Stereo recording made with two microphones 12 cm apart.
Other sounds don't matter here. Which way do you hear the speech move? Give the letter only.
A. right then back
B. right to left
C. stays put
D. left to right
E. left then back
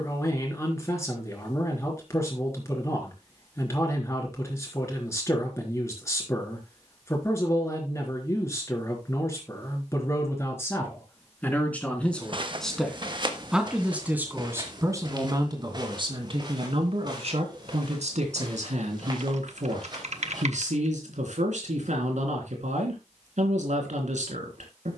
D.